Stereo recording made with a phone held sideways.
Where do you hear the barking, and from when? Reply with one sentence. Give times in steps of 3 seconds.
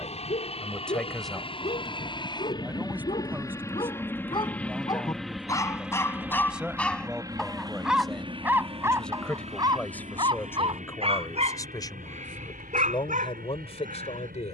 In this clip you hear the barking on the left from 0 s, in the centre from 6 s and on the right from 9 s.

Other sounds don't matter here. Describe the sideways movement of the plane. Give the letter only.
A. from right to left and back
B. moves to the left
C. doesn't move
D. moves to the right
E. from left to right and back
D.